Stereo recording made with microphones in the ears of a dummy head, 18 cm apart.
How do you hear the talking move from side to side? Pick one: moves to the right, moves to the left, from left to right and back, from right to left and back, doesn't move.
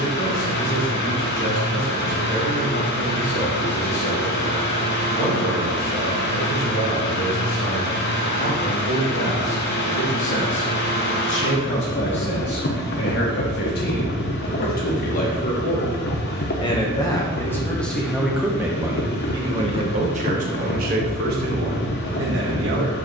moves to the right.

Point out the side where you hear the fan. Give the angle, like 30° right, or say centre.
50° left.